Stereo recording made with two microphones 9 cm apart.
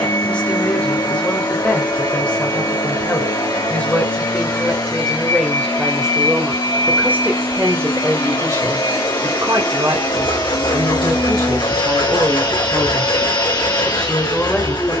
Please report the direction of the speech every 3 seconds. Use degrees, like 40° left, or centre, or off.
10° left, 10° left, 20° right, 50° right, centre.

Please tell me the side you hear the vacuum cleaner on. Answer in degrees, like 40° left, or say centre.
60° left.